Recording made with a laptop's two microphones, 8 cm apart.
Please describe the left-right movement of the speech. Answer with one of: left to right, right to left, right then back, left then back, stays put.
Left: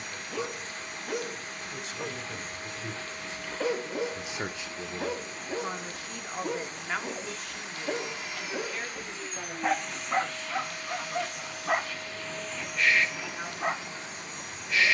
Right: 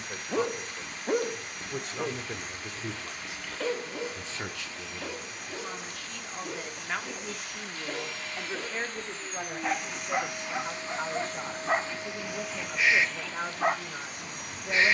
left then back.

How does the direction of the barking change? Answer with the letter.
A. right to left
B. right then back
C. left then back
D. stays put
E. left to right
C.